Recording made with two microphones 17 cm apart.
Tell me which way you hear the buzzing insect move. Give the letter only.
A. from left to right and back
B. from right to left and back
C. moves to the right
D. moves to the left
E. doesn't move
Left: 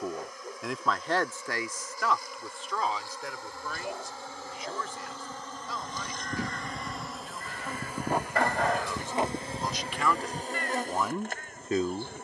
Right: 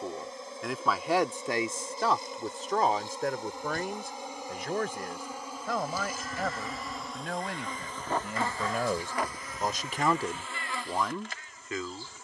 D.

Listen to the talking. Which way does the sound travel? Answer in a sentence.
You can hear the talking move from left to right and back again.